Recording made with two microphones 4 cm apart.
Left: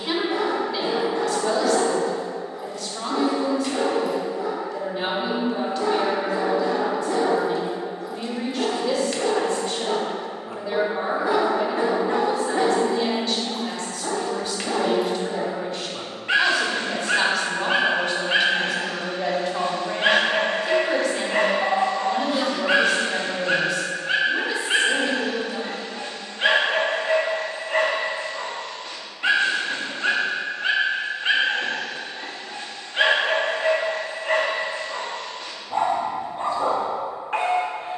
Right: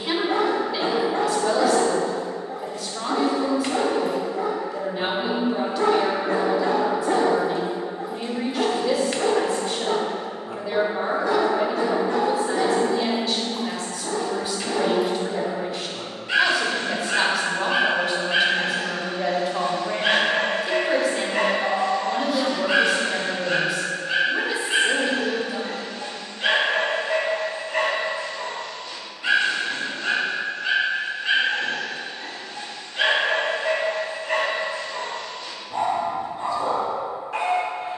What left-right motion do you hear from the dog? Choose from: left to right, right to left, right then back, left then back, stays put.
right to left.